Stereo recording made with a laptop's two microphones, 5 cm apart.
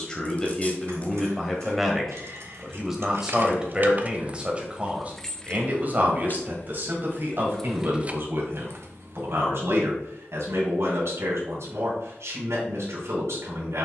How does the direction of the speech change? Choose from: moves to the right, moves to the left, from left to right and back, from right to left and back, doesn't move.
moves to the right.